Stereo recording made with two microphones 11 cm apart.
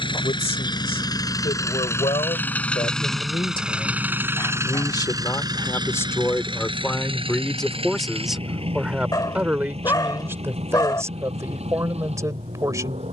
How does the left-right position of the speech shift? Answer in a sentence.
You can hear the speech move to the right.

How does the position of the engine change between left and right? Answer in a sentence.
You can hear the engine travel towards the right.